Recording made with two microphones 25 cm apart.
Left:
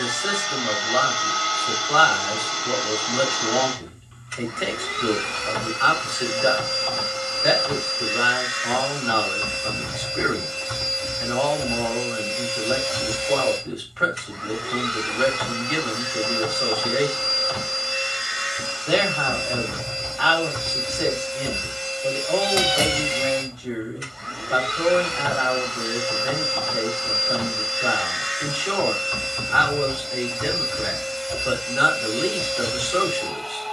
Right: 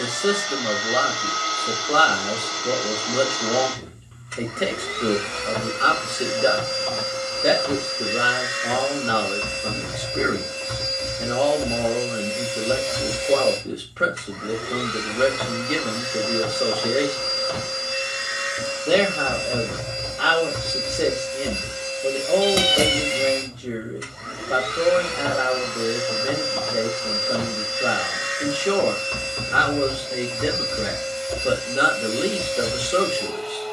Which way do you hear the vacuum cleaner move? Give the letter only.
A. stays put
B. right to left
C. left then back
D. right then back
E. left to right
A.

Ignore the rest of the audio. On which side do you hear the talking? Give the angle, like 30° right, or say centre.
40° right.